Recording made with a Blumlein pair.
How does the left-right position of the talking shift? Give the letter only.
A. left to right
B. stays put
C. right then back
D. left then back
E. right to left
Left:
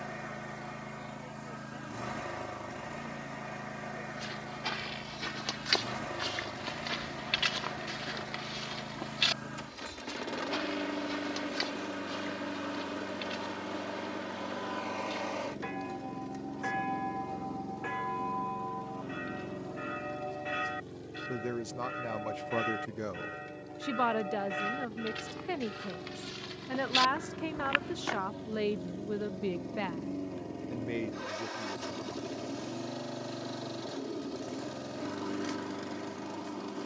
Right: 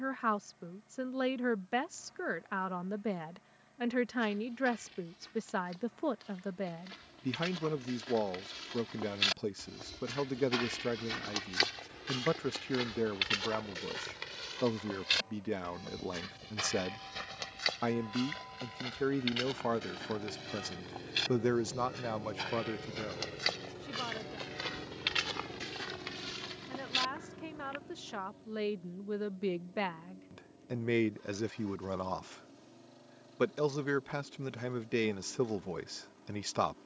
D.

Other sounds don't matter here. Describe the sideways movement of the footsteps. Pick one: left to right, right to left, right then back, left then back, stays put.
right then back.